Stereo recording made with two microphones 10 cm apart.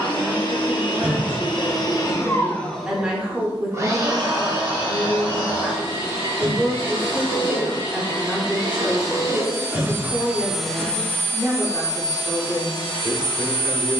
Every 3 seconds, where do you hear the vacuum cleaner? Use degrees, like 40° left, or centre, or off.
40° left, 40° right, 50° right, centre, 50° left.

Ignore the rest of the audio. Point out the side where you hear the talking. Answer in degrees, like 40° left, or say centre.
10° right.